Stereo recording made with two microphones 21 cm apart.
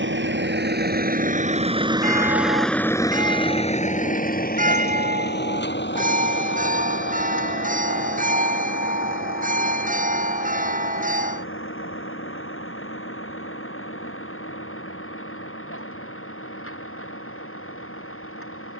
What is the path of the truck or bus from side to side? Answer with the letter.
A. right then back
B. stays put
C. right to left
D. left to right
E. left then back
C.